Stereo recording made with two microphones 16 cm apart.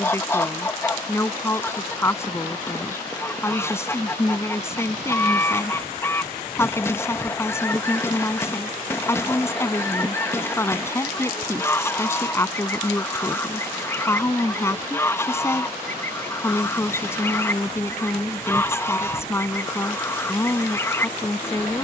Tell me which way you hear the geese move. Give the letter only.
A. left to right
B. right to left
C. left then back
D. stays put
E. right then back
D.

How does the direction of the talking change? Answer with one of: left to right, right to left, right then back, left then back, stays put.
stays put.